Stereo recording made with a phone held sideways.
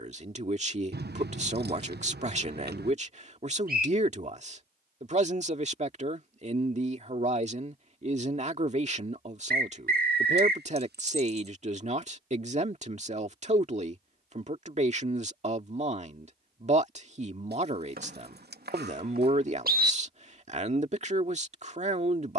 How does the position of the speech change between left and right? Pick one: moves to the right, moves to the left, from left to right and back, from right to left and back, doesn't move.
doesn't move.